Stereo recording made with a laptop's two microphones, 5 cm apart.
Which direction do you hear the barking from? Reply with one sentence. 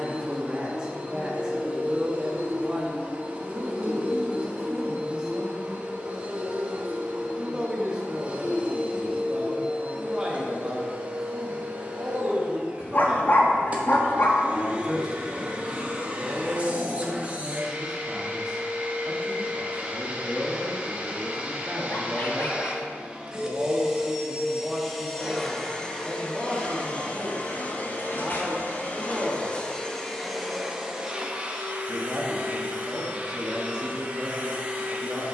You can hear the barking on the left.